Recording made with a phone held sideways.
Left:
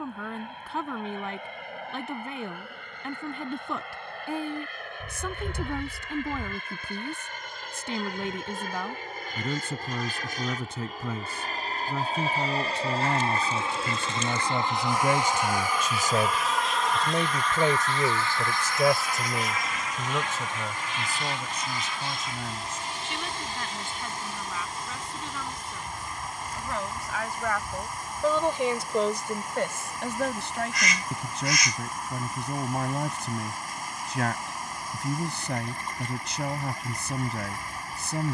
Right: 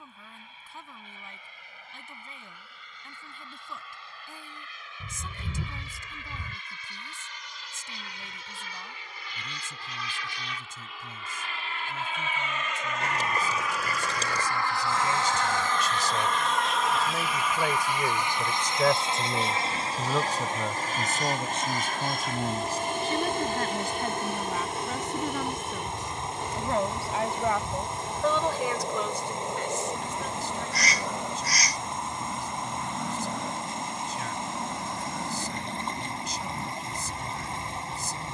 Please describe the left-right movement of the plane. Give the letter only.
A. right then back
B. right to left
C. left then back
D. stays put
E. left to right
E.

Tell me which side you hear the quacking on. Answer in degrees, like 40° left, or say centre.
40° right.